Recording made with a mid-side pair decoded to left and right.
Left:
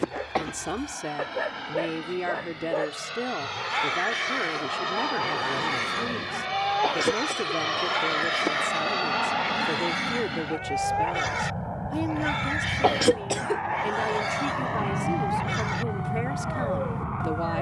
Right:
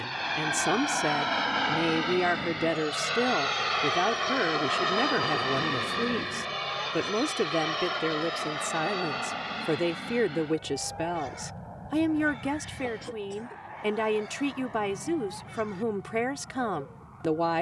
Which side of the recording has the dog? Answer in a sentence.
You can hear the dog on the left.